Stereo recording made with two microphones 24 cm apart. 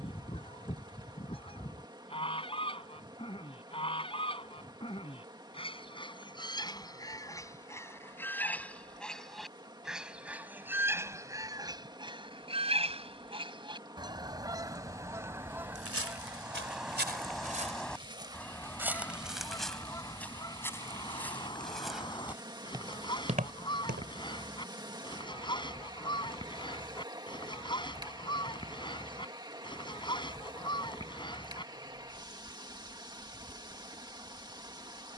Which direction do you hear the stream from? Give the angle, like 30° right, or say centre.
20° right.